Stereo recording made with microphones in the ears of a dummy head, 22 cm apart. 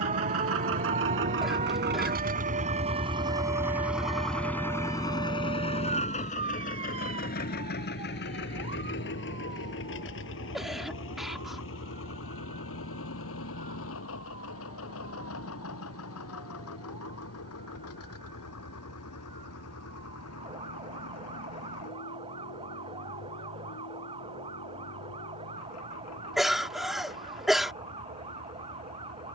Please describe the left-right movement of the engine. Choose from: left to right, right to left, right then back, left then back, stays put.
right to left.